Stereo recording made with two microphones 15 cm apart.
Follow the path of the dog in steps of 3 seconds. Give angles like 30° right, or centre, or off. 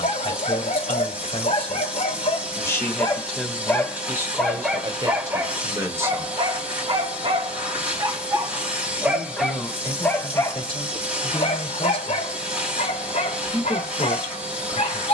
50° left, centre, 30° right, 20° left, 50° left.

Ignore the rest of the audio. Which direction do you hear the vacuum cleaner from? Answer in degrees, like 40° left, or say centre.
10° right.